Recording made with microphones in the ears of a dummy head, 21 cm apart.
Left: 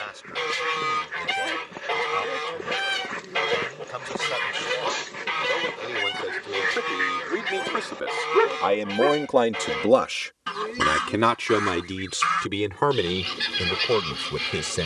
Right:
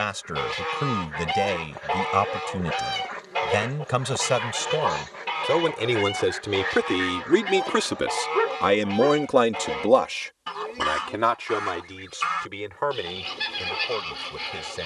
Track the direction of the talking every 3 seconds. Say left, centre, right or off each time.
right, right, right, left, left.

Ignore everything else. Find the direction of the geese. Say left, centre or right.
left.